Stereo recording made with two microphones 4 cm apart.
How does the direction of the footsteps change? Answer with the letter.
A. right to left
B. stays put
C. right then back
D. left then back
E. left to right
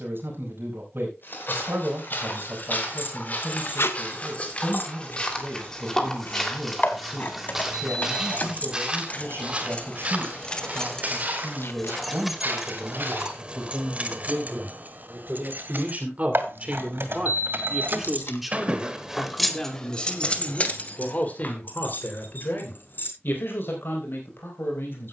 E.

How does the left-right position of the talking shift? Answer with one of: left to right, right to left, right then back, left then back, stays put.
right to left.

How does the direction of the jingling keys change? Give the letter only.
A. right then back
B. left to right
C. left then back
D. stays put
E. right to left
A.